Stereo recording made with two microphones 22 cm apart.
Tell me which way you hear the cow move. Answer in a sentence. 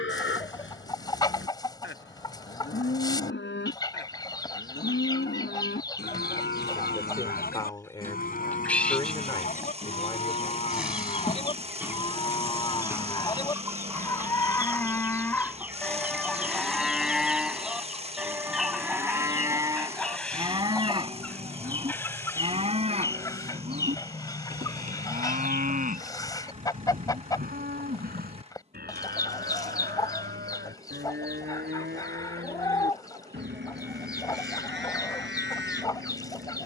You can hear the cow move from left to right.